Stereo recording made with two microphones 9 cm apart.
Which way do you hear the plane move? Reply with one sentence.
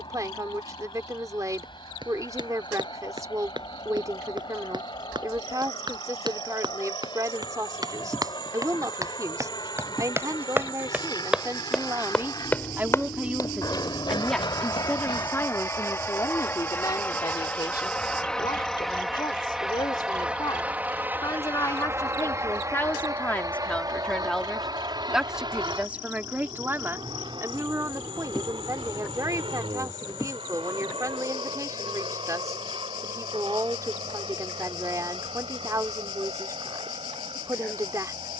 In this clip you hear the plane move from left to right.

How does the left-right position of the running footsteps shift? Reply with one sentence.
In this clip you hear the running footsteps move to the left.